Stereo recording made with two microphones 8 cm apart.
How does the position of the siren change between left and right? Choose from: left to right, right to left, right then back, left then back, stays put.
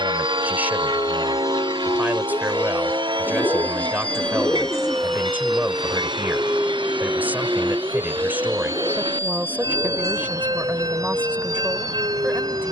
left to right.